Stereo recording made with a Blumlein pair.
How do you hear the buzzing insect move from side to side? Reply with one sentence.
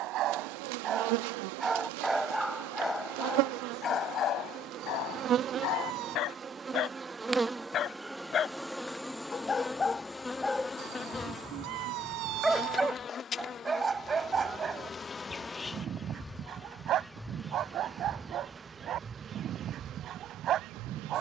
You can hear the buzzing insect go left and come back.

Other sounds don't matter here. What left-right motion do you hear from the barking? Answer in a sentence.
You can hear the barking move from right to left and back again.